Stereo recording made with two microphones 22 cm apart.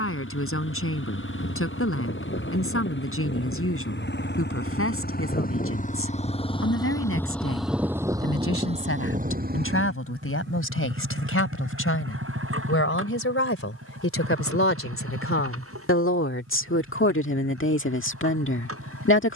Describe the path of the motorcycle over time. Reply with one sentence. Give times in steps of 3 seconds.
You can hear the motorcycle on the left from 0 s, in the centre from 6 s and on the right from 9 s.